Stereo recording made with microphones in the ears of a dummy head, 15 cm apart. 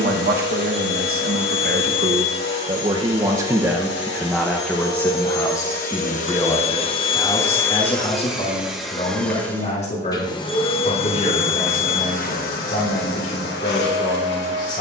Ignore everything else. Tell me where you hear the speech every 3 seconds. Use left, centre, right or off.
right, centre, left, left, left.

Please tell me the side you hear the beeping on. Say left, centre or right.
centre.